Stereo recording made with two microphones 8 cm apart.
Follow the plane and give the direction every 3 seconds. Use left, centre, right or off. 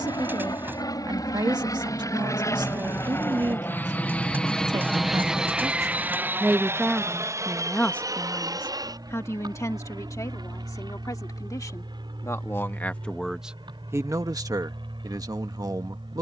left, centre, right, right, right, right.